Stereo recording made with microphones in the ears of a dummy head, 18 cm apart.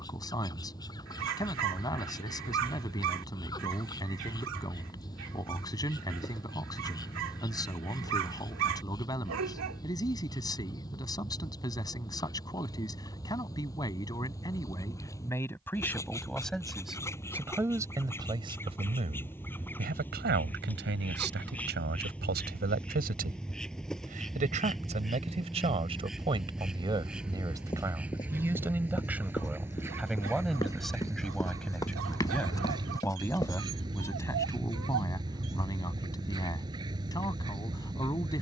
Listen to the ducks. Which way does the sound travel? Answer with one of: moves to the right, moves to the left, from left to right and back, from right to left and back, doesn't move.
moves to the right.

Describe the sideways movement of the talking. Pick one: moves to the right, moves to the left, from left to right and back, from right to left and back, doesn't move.
from left to right and back.